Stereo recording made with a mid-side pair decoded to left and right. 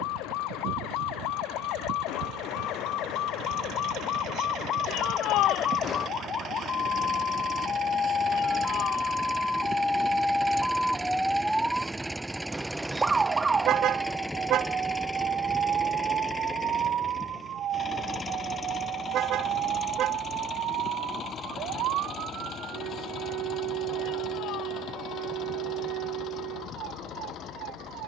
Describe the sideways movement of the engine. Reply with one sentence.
You can hear the engine move to the left.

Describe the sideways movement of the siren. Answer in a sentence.
You can hear the siren move from left to right.